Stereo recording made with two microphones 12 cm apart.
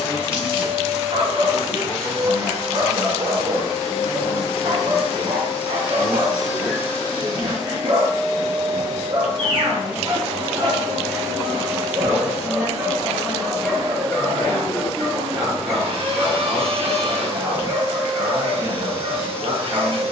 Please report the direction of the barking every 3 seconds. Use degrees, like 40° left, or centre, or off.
50° right, 50° right, 50° right, 40° right, centre, 10° right, 40° right.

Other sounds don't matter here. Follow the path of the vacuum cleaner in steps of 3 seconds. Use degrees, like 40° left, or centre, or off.
60° left, 60° left, 50° left, 20° left, 30° right, 50° right, 50° right.